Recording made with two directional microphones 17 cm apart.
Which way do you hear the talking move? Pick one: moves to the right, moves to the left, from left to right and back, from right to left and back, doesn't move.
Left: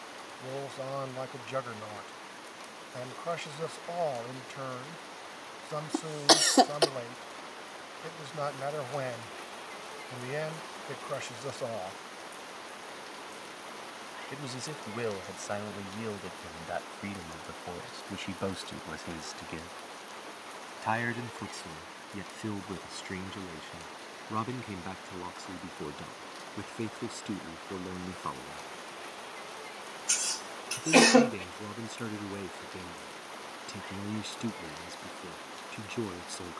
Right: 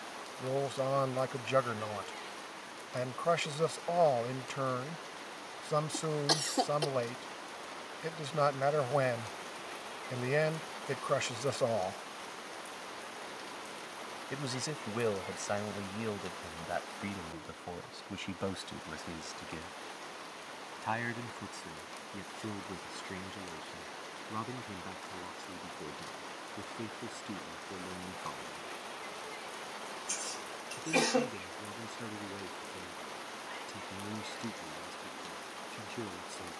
moves to the left.